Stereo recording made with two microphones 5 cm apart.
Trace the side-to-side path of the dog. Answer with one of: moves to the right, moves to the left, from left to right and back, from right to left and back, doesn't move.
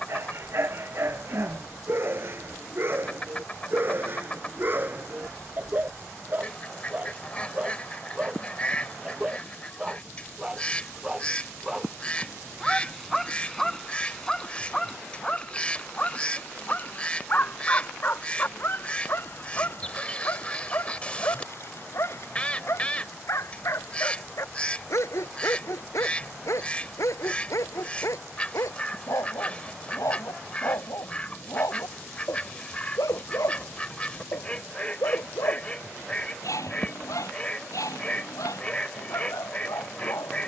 moves to the left.